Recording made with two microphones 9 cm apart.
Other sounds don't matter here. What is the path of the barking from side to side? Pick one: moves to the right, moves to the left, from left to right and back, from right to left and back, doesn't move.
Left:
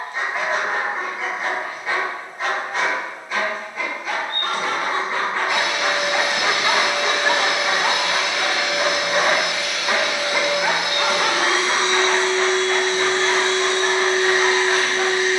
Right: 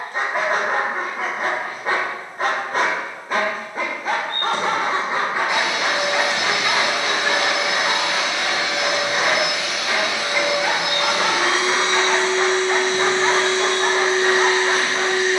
from right to left and back.